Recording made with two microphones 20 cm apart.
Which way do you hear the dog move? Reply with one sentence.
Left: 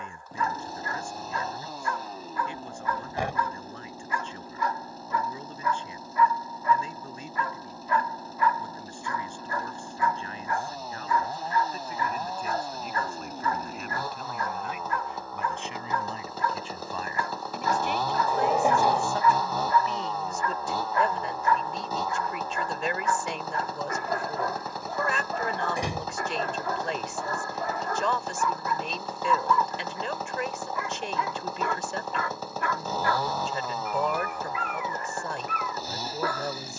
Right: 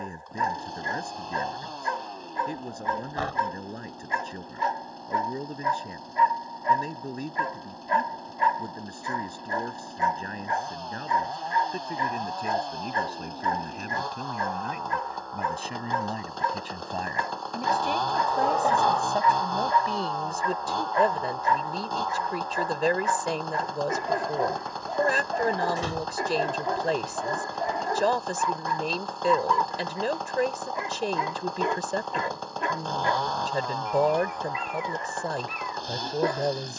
You can hear the dog stay put.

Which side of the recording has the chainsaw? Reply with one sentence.
In this clip you hear the chainsaw in the centre.